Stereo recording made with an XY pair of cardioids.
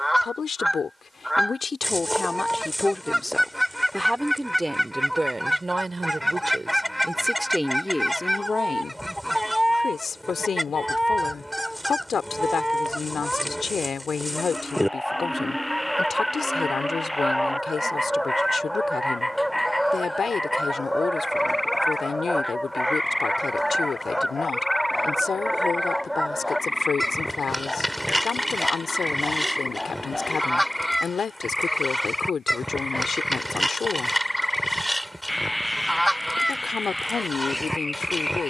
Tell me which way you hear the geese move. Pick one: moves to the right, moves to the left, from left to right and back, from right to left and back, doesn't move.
doesn't move.